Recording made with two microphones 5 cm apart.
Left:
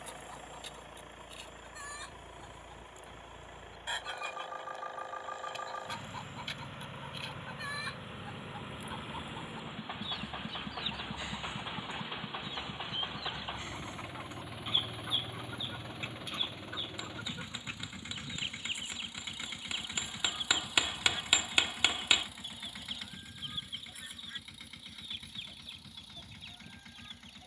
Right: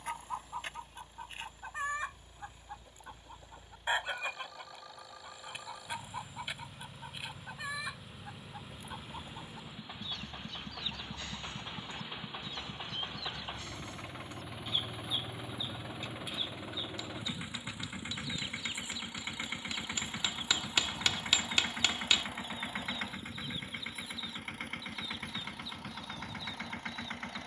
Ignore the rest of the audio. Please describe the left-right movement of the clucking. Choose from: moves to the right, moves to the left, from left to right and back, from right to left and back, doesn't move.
moves to the left.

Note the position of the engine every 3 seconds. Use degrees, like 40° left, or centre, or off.
50° left, 40° left, 30° left, 20° left, 10° left, 10° right, 30° right, 40° right, 50° right.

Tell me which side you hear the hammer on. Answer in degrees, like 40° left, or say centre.
20° left.